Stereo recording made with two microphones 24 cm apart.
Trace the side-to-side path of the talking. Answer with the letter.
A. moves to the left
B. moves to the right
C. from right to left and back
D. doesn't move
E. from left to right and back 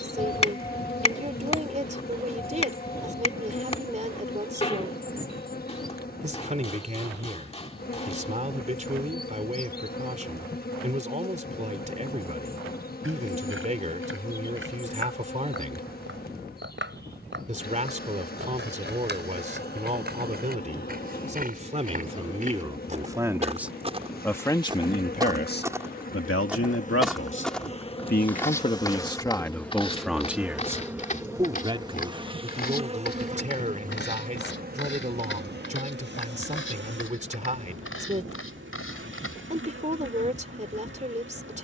C.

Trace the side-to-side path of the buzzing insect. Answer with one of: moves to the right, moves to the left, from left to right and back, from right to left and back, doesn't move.
moves to the right.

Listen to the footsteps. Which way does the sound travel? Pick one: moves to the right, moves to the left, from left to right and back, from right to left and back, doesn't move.
moves to the left.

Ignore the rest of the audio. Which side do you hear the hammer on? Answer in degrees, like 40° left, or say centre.
30° left.